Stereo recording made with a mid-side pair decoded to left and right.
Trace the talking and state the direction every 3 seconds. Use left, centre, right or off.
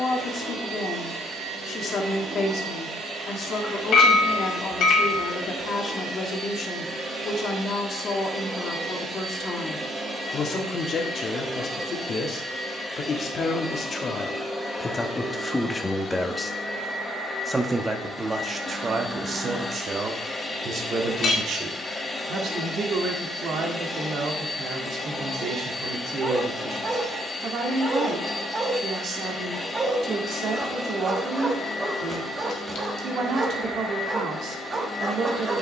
left, left, left, left, left, centre, right, right, right, right, right, right.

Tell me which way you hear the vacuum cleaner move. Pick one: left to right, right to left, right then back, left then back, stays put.
right to left.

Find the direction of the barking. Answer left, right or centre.
right.